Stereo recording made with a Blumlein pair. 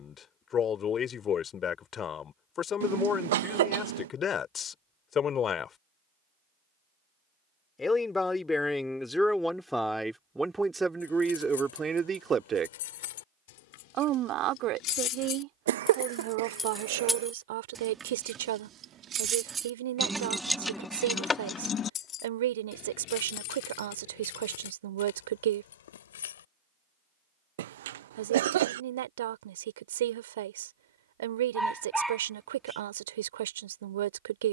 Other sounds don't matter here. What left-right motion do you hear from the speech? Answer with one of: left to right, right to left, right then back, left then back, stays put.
left to right.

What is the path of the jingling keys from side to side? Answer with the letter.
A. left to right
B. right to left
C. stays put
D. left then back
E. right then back
E.